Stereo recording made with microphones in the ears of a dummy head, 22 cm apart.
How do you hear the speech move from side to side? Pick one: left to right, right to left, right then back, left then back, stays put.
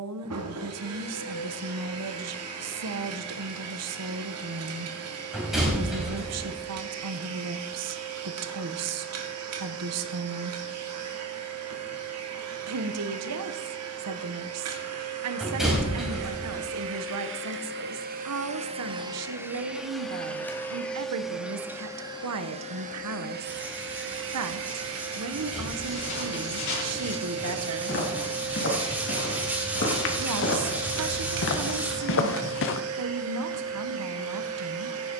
stays put.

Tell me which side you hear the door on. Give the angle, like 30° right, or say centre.
centre.